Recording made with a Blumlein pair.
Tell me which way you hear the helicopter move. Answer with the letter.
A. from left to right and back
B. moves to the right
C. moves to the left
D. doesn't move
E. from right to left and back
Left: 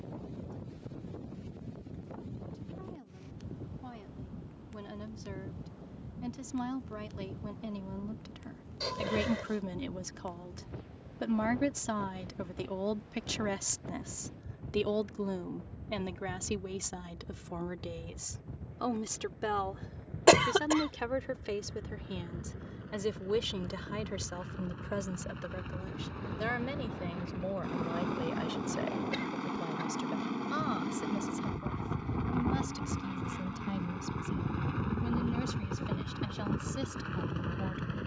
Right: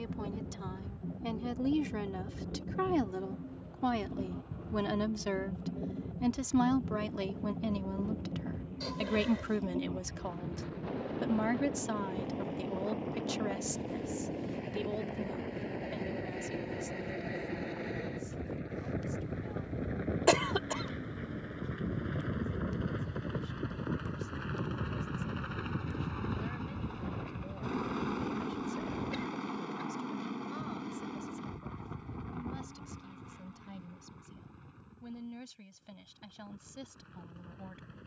C.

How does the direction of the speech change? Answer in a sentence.
In this clip you hear the speech move to the left.